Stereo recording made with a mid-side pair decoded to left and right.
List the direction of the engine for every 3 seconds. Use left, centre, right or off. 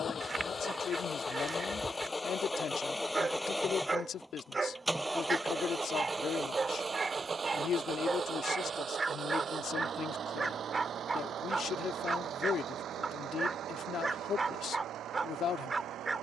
left, centre, right, right, right, right.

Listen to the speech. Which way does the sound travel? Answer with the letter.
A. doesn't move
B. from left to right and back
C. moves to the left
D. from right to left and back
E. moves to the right
A.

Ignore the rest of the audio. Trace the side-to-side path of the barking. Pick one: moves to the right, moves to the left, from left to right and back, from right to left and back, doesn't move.
doesn't move.